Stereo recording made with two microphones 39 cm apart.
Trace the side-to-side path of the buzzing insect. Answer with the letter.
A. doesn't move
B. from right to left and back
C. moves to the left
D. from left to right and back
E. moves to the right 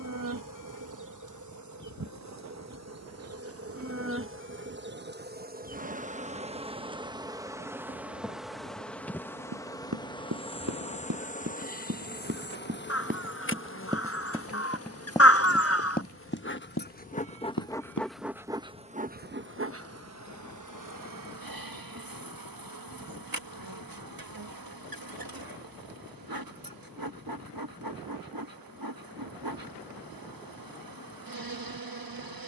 B.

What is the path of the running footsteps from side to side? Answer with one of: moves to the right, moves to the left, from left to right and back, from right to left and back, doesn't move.
moves to the left.